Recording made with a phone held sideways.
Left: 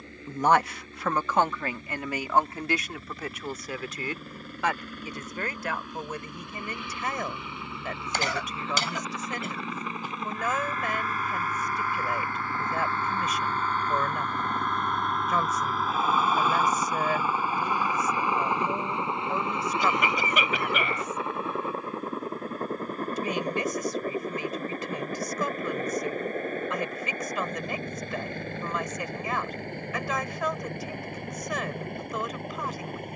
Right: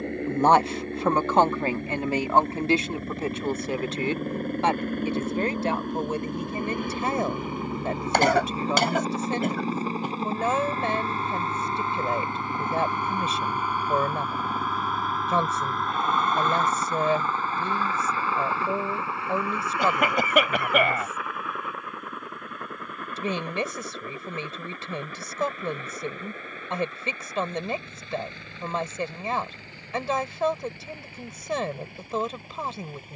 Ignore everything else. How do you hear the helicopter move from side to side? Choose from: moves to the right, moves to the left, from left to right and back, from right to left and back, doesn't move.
moves to the left.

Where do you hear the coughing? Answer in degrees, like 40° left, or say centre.
60° right.